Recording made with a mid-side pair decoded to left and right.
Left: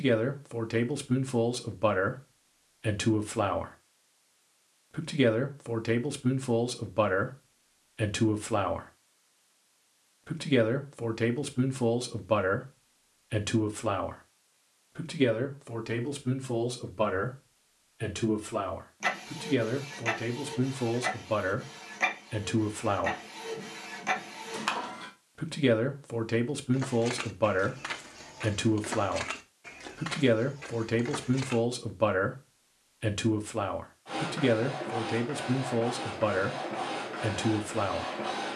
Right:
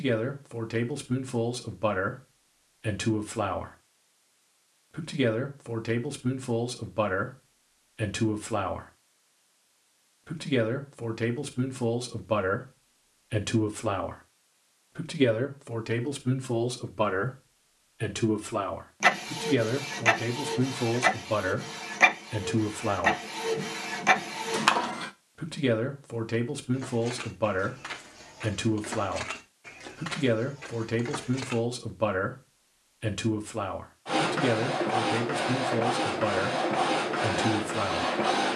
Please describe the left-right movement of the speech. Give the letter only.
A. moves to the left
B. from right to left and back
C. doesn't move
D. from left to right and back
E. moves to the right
D.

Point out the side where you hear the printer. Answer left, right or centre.
right.